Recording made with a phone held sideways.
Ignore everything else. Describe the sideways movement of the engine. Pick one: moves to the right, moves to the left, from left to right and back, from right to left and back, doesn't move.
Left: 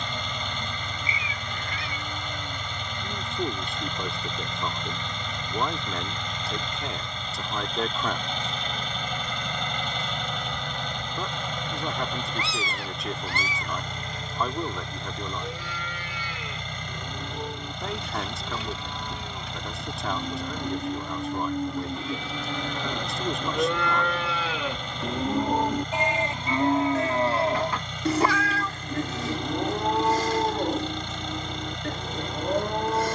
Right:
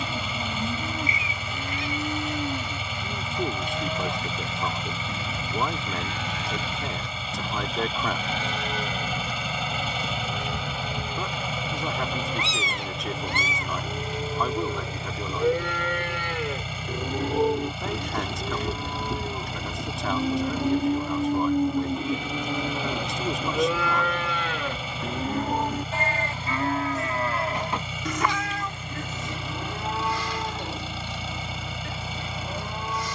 doesn't move.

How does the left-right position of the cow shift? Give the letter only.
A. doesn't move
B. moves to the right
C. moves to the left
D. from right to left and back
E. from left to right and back
C.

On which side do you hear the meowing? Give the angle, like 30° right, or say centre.
20° right.